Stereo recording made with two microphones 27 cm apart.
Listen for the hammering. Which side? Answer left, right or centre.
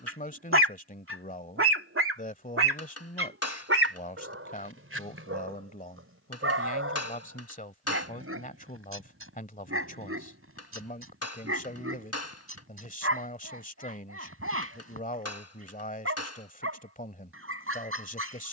left.